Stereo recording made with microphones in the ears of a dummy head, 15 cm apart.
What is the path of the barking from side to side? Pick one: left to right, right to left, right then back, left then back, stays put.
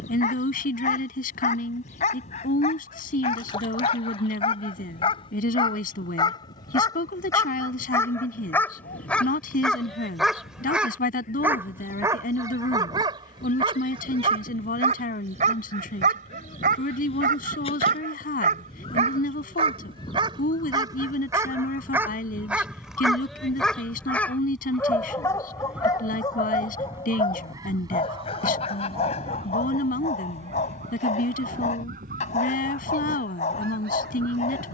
right then back.